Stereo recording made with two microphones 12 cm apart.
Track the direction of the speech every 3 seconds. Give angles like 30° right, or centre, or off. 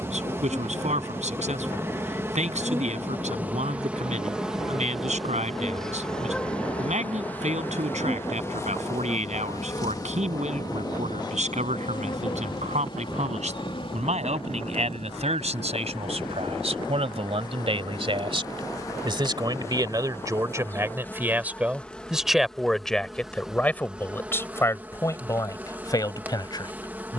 70° right, 70° right, 70° right, 70° right, 70° right, 60° right, 30° right, centre, 30° left.